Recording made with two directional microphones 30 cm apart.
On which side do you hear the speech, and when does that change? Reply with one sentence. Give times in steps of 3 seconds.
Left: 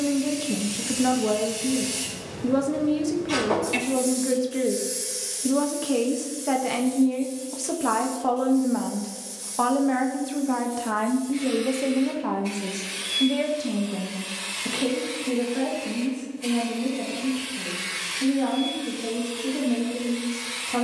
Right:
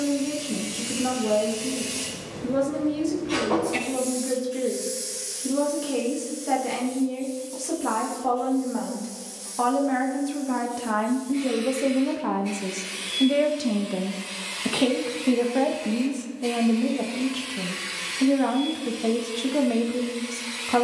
You can hear the speech on the left from 0 s, in the centre from 9 s and on the right from 12 s.